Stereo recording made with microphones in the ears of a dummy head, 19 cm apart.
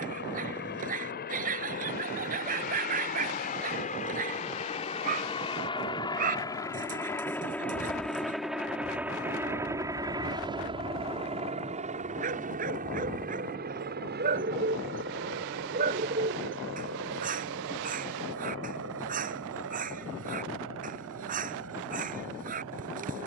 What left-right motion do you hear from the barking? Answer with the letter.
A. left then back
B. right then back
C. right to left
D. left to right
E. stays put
E.